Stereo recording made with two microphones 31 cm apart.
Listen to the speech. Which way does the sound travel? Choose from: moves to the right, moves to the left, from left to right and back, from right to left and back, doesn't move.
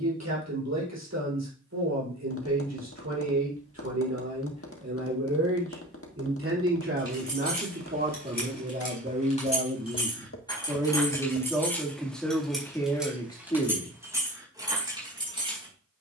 moves to the left.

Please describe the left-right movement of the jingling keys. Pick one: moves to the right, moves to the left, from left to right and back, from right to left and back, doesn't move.
moves to the right.